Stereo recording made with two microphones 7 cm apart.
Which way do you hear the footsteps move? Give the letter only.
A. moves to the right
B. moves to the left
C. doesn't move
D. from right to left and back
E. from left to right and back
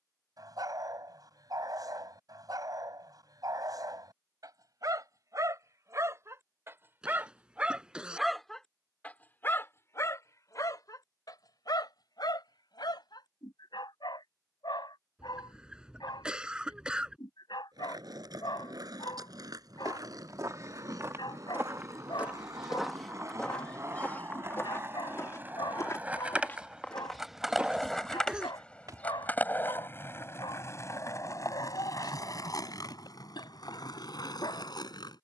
D.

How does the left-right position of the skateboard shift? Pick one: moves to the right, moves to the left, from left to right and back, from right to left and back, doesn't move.
moves to the left.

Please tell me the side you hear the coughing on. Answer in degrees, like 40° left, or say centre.
10° right.